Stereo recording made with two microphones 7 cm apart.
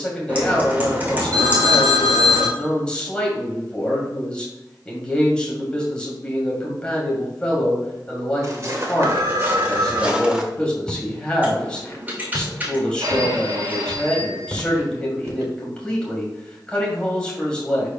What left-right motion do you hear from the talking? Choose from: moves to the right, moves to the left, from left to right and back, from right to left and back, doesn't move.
doesn't move.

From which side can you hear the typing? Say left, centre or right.
right.